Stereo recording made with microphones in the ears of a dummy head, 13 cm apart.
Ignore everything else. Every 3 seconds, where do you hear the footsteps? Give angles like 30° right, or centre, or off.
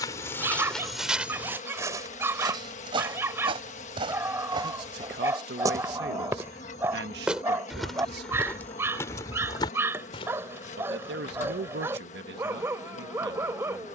10° right, 30° right, centre, 30° left, off.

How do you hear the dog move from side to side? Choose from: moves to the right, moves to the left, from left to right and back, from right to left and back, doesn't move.
doesn't move.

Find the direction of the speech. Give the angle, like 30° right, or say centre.
80° right.